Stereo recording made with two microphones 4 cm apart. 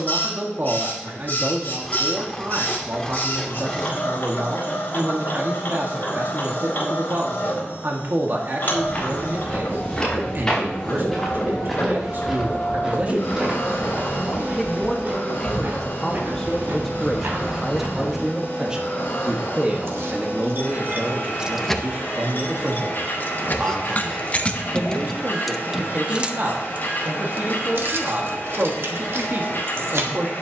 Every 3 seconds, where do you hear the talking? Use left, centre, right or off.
right, right, right, right, right, centre, right, right, right, right.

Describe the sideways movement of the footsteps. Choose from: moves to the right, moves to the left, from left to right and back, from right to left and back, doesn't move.
moves to the right.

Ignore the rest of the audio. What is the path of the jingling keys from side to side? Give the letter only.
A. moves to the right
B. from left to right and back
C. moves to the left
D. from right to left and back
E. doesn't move
D.